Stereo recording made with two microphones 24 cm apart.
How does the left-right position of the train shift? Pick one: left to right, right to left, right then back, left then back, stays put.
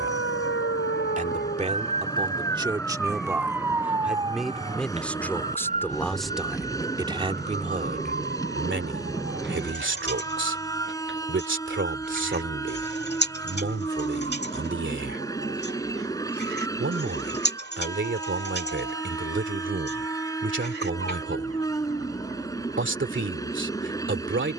stays put.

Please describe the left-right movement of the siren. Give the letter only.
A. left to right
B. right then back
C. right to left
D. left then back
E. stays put
A.